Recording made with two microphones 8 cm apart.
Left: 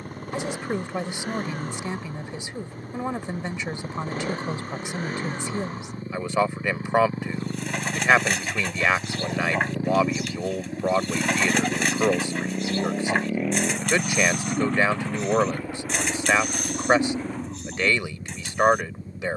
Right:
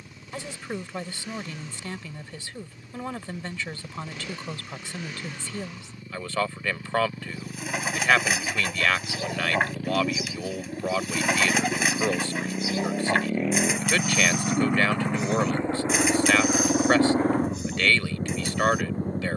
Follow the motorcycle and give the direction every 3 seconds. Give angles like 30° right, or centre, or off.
50° left, 40° left, 40° left, 20° left, centre, 30° right, 50° right.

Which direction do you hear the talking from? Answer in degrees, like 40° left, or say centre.
20° left.